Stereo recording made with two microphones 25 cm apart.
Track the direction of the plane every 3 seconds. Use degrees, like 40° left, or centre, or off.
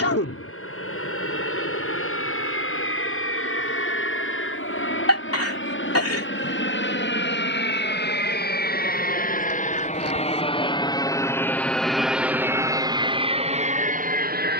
60° left, 60° left, 50° left, 20° left, 20° right.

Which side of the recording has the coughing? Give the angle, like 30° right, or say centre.
70° left.